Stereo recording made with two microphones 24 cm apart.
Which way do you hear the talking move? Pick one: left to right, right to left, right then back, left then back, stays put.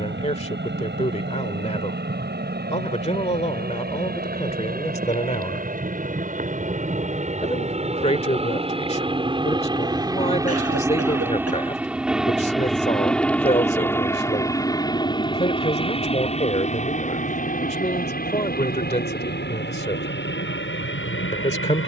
stays put.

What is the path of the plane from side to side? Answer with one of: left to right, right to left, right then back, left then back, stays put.
right to left.